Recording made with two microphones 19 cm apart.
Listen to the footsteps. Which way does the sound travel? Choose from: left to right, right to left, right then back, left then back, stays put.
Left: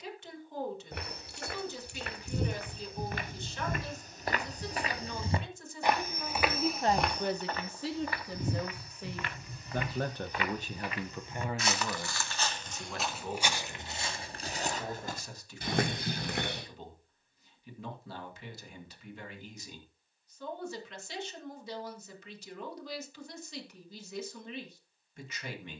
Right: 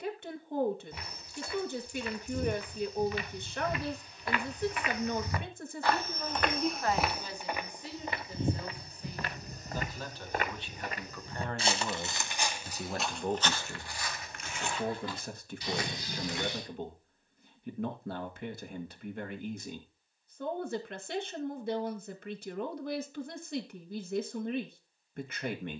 right then back.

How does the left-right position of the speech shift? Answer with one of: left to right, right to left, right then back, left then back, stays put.
left then back.